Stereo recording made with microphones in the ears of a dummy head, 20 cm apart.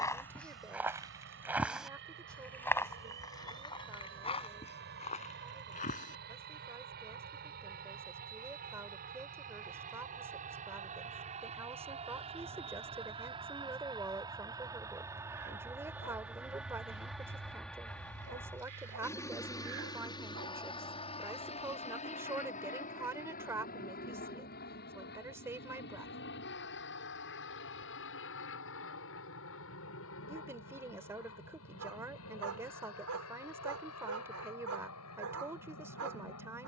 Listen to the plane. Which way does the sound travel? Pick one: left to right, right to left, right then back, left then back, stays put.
right to left.